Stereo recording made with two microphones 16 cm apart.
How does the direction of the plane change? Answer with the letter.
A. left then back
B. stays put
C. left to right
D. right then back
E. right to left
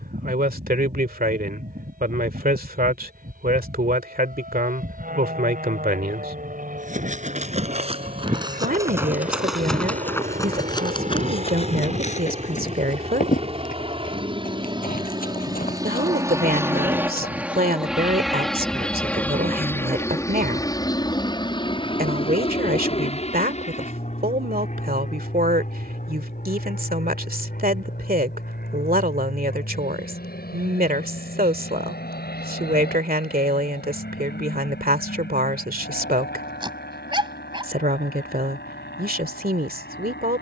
E.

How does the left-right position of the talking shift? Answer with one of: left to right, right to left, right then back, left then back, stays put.
stays put.